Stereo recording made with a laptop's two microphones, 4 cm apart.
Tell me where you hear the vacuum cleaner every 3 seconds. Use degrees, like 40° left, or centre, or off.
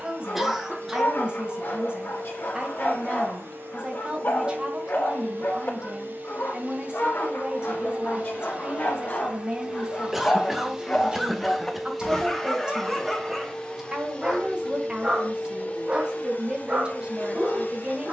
70° right, 60° right, 40° right, 10° right, 20° left, 50° left.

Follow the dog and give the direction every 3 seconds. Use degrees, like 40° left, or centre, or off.
60° left, 60° left, 60° left, 30° left, centre, 30° right.